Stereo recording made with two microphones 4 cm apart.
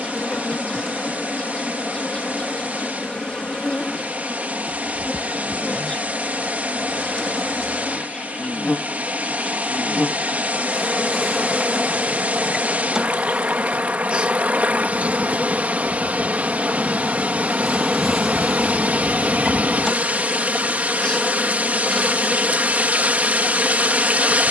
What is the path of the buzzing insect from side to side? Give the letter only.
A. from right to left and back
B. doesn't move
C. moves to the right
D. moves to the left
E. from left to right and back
E.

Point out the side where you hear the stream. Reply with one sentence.
In this clip you hear the stream on the right.